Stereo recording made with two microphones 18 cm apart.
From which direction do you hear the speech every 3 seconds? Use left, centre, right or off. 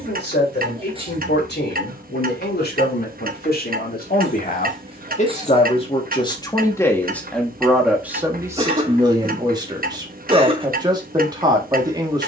left, left, centre, right.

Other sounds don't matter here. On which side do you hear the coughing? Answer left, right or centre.
right.